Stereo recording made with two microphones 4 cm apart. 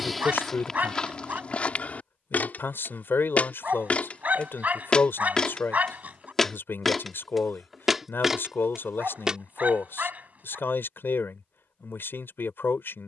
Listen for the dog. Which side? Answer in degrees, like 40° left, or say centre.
40° right.